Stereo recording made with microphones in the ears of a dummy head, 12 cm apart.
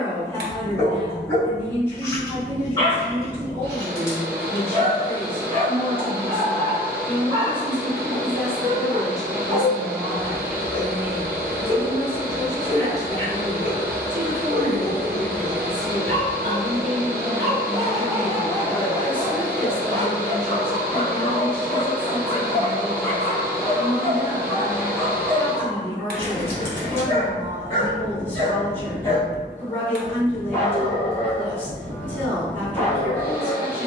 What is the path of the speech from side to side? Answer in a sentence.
In this clip you hear the speech go right and come back.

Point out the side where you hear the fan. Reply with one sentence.
In this clip you hear the fan on the right.